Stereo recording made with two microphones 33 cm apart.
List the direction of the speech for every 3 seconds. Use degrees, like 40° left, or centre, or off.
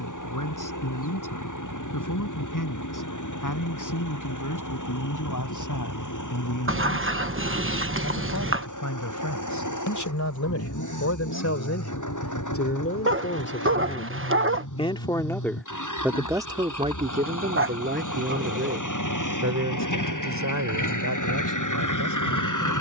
70° left, 70° left, 70° left, 60° left, 30° left, 10° right, 50° right, 60° right.